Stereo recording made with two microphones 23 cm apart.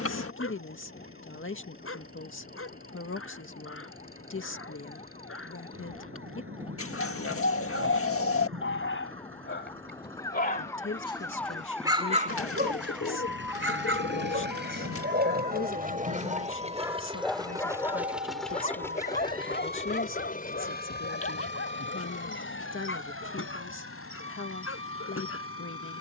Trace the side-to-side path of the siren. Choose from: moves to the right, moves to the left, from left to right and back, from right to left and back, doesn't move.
moves to the right.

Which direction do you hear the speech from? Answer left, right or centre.
left.